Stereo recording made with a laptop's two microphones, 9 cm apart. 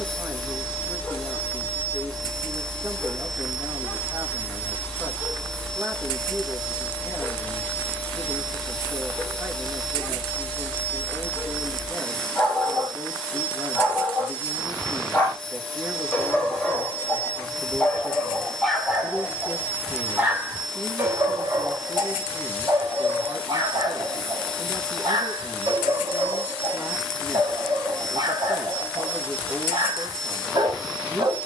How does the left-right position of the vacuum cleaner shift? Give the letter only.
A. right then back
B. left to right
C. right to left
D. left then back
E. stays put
E.